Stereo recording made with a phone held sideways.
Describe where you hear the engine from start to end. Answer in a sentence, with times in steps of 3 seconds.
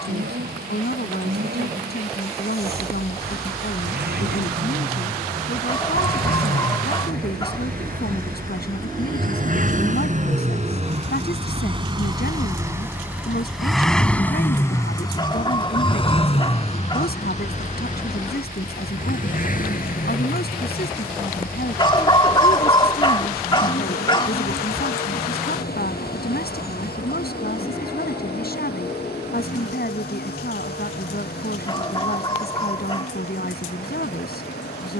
You can hear the engine on the right from 0 s, in the centre from 12 s and on the left from 15 s.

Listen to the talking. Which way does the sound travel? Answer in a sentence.
In this clip you hear the talking stay put.